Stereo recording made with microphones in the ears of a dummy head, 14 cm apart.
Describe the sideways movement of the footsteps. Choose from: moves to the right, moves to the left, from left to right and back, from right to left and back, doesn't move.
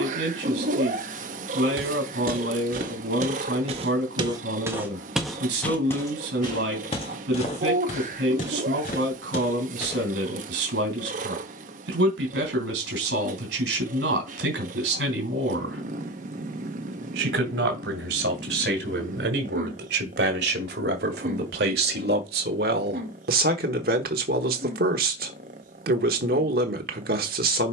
moves to the left.